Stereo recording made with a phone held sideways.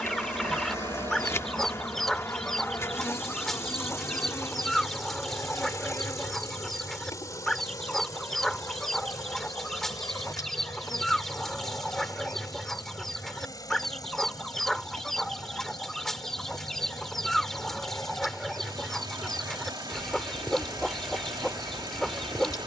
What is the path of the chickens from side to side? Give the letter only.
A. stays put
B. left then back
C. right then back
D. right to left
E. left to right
A.